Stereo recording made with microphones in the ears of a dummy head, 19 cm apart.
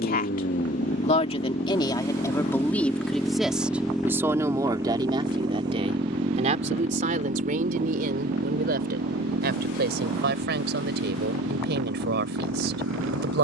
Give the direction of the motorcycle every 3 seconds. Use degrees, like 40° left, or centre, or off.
30° left, 10° right, 30° right, 50° right, 60° right.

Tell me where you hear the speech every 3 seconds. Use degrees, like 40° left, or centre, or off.
20° left, 10° right, 40° right, 50° right, 50° right.